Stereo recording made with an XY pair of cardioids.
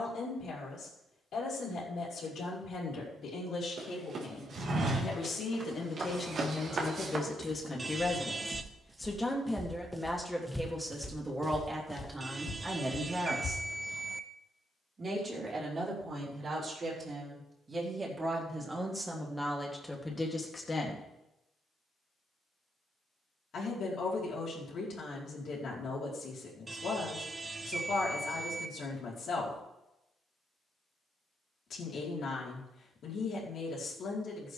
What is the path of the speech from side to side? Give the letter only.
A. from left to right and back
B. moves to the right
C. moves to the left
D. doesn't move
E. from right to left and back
A.